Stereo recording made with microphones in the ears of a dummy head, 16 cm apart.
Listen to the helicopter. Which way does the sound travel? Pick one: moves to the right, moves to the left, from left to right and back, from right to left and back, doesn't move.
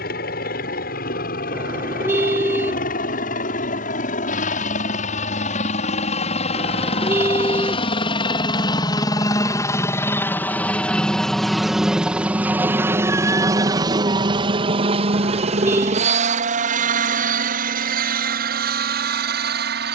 moves to the right.